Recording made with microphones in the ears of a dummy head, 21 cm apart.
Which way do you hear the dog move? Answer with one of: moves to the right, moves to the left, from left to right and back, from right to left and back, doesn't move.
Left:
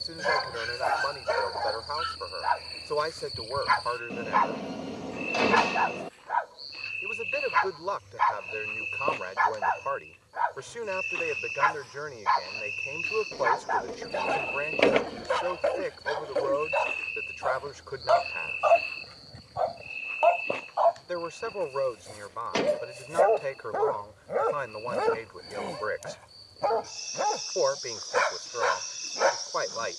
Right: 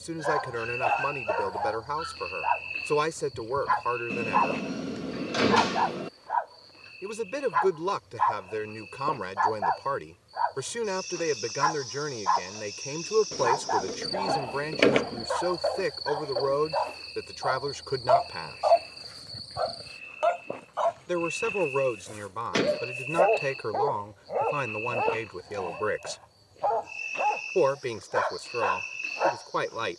from left to right and back.